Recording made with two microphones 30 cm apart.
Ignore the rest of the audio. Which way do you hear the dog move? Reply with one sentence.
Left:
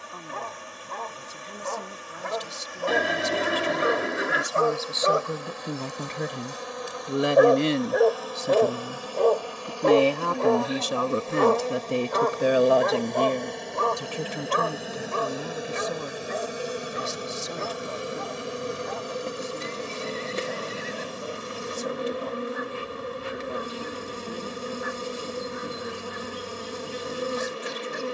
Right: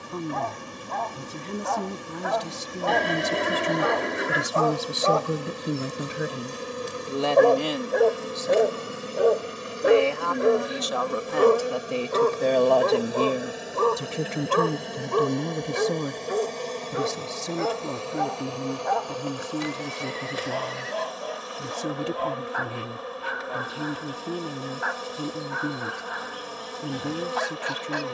You can hear the dog travel towards the right.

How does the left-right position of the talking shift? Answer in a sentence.
You can hear the talking go left and come back.